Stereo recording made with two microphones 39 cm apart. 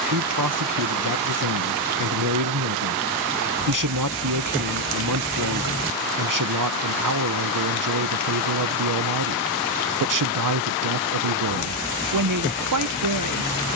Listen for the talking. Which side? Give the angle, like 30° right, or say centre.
50° right.